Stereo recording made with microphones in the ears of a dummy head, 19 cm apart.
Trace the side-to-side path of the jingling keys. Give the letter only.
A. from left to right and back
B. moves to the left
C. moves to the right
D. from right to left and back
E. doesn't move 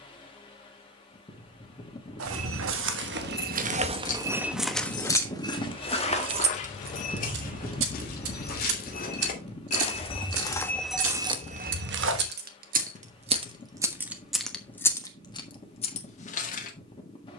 A.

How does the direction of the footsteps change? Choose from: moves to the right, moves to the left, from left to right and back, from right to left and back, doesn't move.
from right to left and back.